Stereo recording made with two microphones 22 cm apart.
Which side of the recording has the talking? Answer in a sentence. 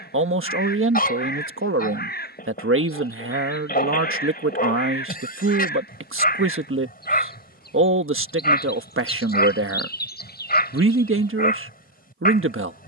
You can hear the talking on the right.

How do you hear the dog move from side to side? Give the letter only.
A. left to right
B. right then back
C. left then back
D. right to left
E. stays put
E.